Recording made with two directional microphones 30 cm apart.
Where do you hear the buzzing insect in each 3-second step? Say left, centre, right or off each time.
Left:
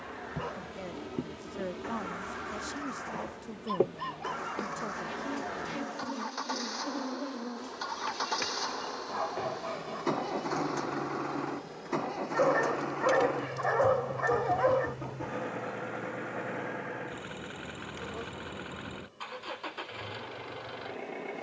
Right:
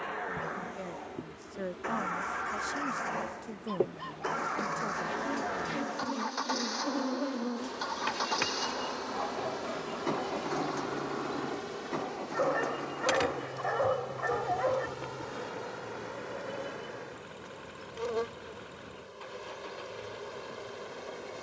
left, centre, right, right, right, right, right.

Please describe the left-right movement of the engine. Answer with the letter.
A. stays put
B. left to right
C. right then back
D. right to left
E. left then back
D.